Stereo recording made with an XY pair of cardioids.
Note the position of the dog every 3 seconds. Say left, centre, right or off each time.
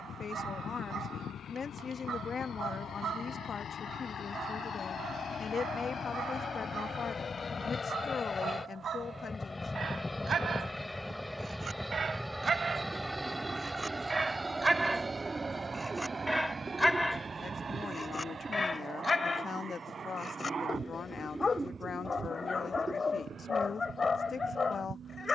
right, right, right, right, right, centre, left, left, left.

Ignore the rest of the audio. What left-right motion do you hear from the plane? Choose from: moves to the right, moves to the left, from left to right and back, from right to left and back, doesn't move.
moves to the right.